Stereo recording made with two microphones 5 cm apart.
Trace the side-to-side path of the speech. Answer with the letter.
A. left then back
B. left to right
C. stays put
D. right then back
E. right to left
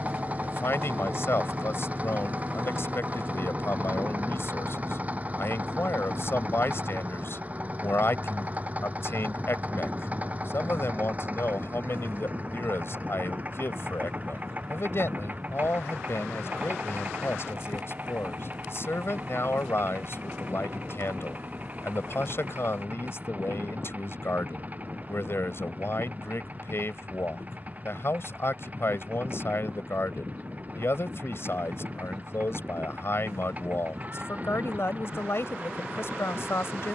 C.